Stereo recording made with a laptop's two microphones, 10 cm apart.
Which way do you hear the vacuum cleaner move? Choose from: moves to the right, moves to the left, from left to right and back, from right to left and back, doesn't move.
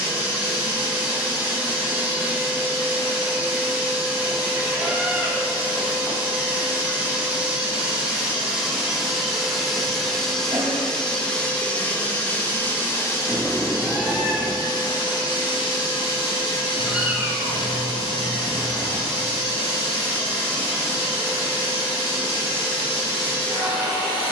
moves to the left.